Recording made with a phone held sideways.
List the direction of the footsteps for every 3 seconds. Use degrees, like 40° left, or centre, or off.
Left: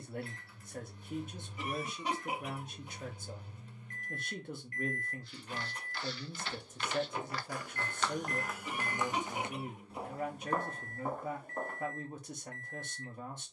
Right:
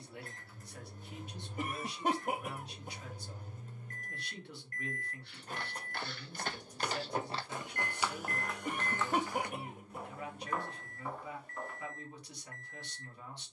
off, 60° right, 20° right, 40° left, off.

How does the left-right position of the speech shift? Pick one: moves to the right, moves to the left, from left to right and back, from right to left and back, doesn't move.
doesn't move.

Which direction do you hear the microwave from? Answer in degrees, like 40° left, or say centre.
40° right.